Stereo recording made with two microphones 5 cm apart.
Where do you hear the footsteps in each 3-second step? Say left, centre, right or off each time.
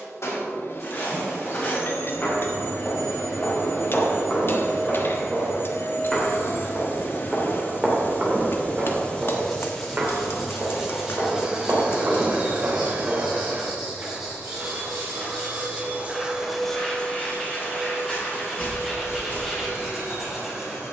left, left, centre, right, right, centre, left.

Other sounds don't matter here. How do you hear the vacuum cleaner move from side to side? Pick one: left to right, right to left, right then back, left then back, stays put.
right then back.